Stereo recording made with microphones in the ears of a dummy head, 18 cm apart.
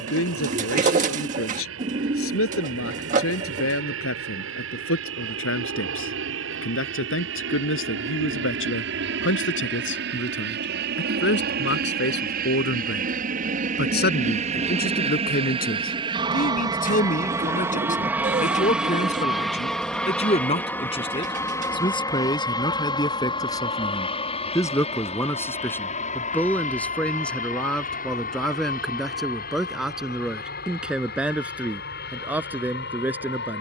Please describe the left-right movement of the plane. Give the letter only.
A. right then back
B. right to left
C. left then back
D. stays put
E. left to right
B.